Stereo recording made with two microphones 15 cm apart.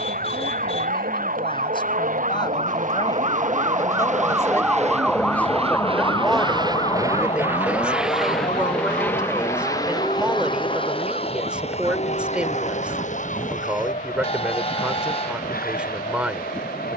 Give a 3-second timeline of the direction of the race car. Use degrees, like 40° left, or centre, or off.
70° right, 50° right, 10° right, 30° left, 50° left, 60° left.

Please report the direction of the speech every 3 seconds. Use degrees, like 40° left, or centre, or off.
30° left, 20° left, 10° right, 10° right, 10° right, 10° right.